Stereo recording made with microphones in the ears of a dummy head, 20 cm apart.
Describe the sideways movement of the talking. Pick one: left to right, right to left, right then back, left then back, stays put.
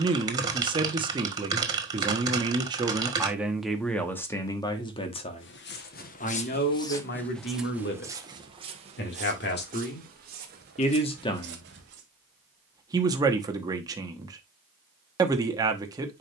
left then back.